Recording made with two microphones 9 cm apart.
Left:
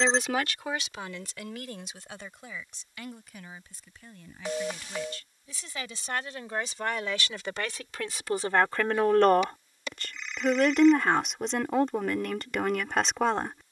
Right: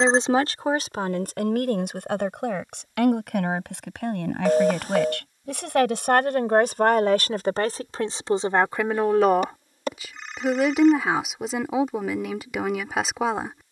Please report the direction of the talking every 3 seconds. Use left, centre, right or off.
right, right, right, centre, centre.